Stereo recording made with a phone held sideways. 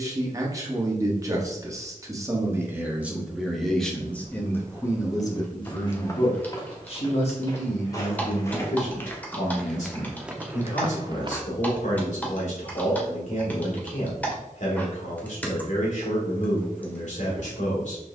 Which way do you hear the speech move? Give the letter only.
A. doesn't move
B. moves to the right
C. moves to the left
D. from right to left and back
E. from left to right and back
C.